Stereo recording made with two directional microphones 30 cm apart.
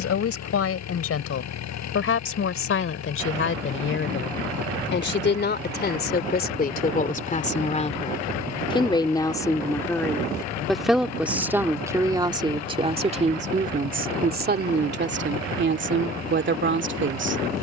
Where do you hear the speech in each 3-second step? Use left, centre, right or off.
left, left, left, centre, right, right.